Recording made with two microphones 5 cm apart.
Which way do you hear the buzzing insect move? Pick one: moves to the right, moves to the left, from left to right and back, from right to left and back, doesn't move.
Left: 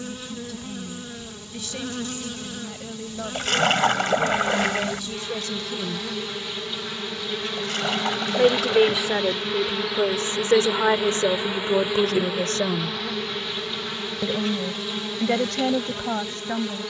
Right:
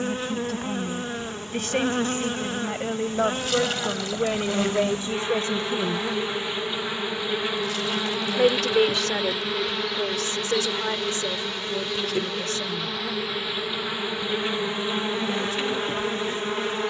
from right to left and back.